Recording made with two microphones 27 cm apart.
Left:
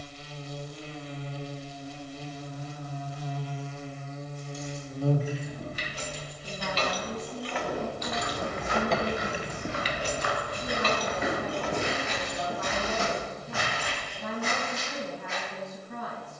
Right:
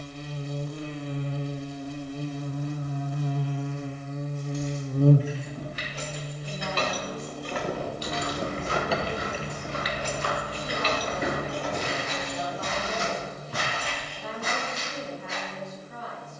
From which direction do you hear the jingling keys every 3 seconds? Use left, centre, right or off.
off, right, right, left, left, off.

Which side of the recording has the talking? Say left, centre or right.
left.